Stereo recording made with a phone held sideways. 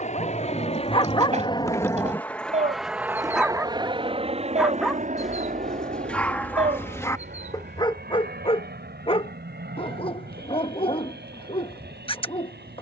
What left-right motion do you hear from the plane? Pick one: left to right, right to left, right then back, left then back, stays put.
left to right.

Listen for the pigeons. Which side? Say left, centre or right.
right.